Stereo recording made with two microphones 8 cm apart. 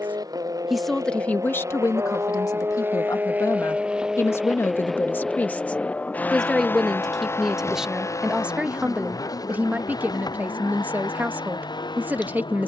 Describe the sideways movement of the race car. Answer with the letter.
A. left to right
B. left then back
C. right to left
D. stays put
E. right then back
C.